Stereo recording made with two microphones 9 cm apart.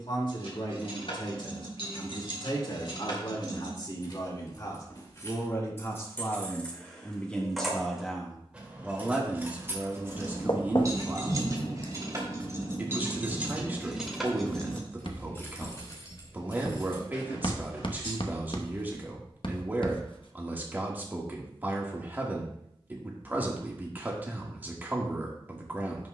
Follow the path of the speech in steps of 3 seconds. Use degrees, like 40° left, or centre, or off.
50° left, 40° left, 10° left, 20° right, 20° right, 20° right, 20° right, 20° right, 20° right.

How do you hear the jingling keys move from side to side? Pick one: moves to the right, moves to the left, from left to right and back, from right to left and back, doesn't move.
from left to right and back.